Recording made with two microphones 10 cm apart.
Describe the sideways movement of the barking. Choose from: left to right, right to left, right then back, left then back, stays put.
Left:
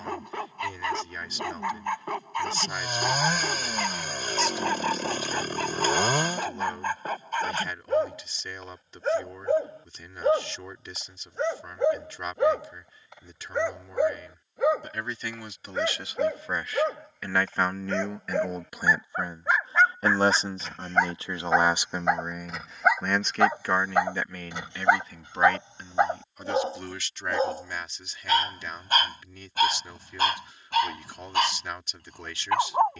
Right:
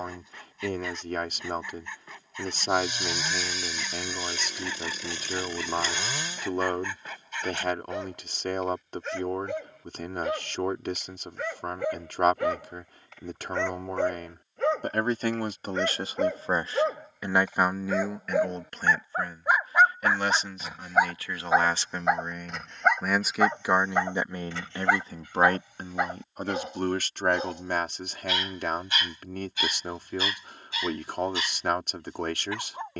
right then back.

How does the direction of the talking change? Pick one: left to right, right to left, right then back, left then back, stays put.
left then back.